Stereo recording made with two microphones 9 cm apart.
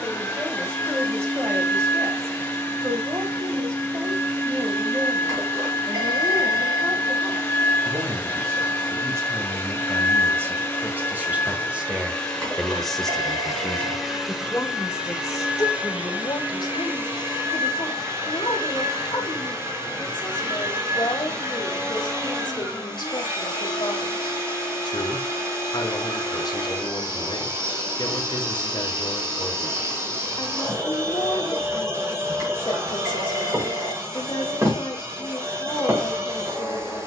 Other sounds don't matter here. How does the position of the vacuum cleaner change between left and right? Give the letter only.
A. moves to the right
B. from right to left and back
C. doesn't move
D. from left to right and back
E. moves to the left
A.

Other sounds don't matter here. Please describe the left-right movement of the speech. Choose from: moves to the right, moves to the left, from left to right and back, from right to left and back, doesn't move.
moves to the left.